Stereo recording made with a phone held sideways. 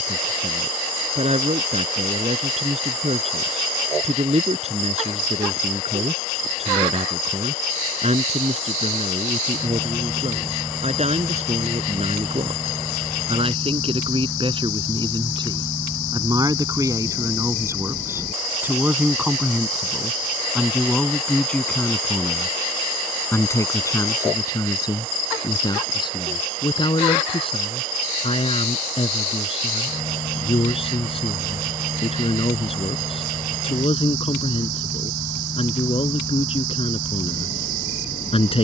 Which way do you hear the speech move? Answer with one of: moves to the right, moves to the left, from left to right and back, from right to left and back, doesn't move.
moves to the left.